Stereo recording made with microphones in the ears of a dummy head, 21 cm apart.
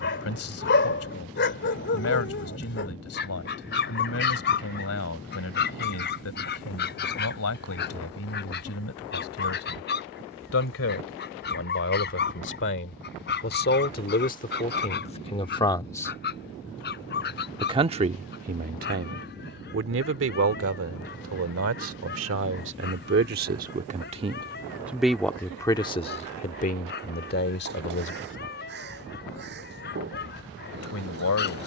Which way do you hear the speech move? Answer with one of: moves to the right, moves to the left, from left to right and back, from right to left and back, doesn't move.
from left to right and back.